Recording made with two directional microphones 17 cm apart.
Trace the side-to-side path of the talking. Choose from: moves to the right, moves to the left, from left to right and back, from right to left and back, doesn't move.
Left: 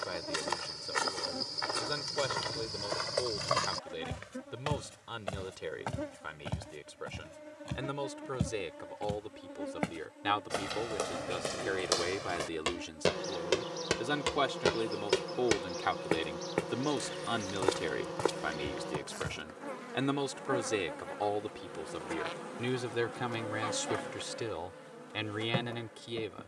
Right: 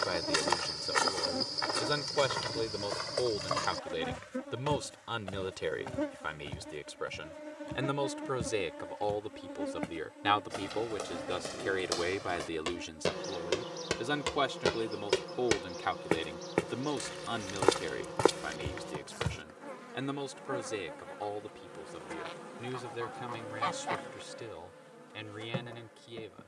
moves to the left.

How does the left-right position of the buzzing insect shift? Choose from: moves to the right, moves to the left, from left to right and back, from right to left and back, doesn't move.
moves to the left.